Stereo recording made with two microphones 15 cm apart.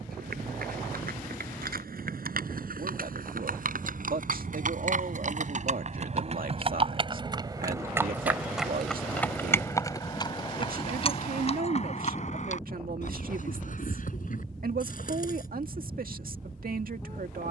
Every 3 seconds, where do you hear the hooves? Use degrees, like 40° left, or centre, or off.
70° right, 60° right, 20° right, 30° left, 60° left, 60° left.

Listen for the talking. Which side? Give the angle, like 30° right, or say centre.
70° right.